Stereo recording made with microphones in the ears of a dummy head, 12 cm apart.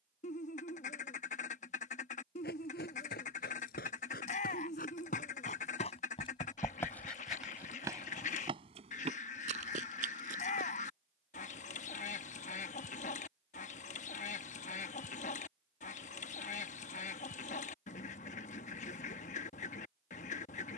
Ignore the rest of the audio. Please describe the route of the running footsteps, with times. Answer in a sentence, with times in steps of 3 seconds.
In this clip you hear the running footsteps on the left from 0 s, in the centre from 6 s, on the right from 9 s and not at all from 12 s.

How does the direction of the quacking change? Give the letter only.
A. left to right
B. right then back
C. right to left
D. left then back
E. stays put
E.